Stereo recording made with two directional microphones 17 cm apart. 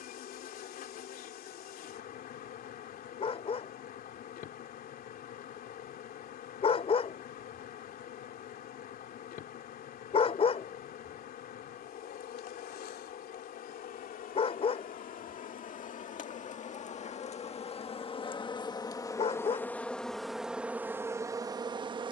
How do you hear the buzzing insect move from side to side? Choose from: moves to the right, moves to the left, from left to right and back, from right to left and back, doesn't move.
moves to the right.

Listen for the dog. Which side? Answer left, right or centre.
left.